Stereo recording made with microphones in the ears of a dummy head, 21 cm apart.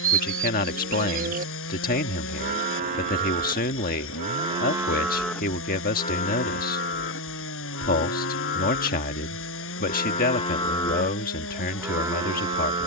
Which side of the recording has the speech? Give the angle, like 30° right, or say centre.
40° left.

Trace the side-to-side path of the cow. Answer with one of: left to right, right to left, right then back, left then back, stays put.
left then back.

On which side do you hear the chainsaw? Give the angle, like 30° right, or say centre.
60° left.